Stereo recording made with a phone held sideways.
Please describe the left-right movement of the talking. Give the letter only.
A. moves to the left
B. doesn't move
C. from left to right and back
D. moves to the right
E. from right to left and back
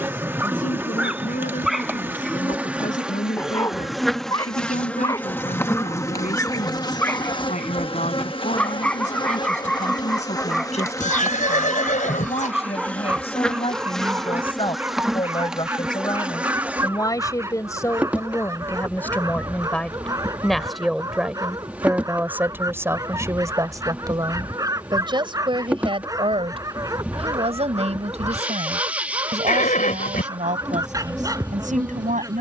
D.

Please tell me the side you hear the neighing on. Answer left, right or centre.
left.